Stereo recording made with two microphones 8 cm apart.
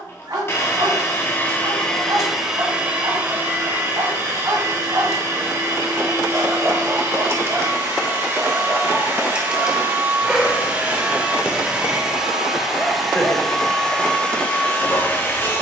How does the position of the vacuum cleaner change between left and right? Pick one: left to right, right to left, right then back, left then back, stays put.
right then back.